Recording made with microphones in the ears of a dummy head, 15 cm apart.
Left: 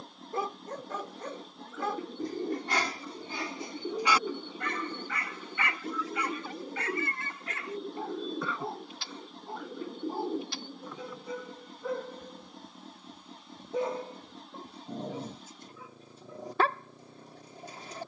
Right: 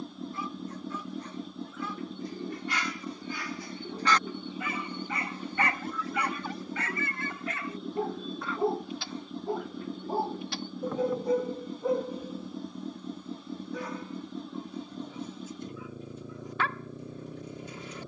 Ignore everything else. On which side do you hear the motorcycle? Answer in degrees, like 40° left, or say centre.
80° right.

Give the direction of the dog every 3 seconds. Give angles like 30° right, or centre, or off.
40° left, centre, 70° right, 40° right, 20° left, 30° left.